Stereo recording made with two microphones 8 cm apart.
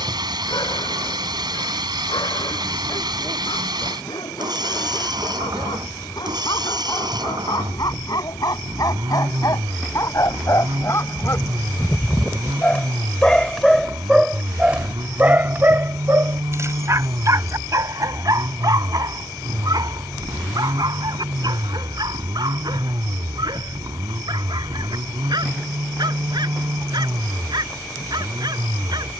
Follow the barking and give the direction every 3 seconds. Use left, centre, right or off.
left, left, left, left, centre, right, right, right, right, right.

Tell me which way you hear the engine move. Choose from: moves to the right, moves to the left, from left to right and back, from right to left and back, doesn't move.
doesn't move.